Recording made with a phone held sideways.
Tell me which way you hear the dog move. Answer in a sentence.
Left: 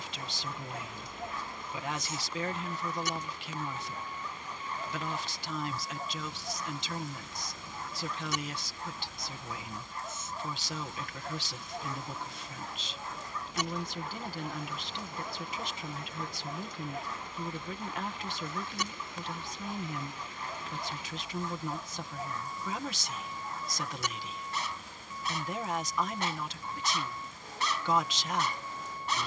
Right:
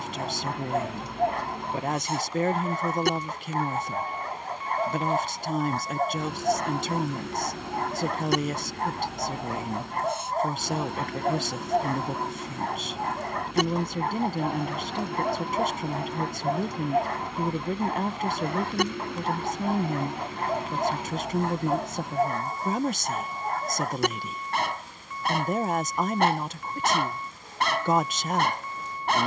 You can hear the dog stay put.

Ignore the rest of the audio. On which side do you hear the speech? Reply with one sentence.
You can hear the speech on the right.